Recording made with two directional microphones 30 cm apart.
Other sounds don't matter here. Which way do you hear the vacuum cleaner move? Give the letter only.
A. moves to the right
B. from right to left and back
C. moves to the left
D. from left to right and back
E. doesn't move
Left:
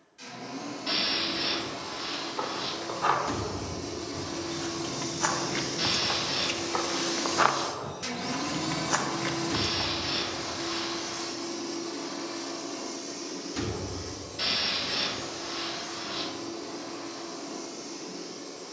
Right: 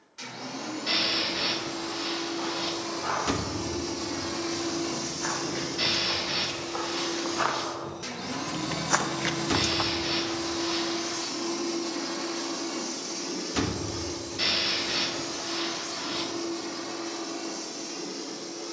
B.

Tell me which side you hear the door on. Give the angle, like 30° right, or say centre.
50° right.